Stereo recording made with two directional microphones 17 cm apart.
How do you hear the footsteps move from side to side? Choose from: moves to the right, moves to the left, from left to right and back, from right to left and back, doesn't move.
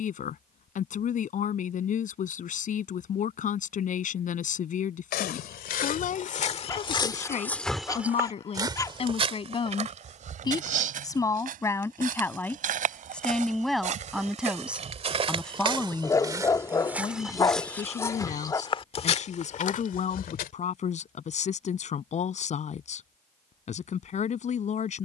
from left to right and back.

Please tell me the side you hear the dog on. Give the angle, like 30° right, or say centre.
20° left.